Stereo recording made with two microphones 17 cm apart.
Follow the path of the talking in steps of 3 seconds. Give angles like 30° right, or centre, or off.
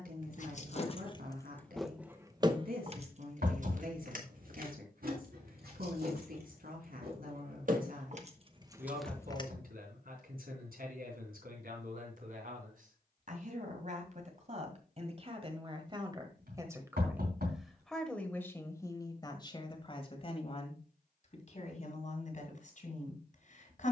70° right, 70° right, 70° right, 70° right, 50° right, 20° right, 30° left, 50° left.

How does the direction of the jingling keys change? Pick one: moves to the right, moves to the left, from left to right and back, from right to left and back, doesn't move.
from left to right and back.